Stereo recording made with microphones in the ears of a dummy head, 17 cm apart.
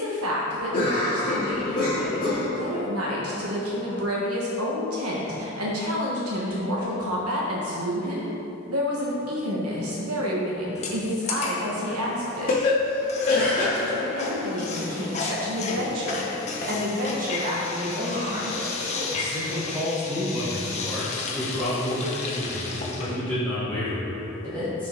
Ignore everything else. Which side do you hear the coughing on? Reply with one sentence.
In this clip you hear the coughing on the left.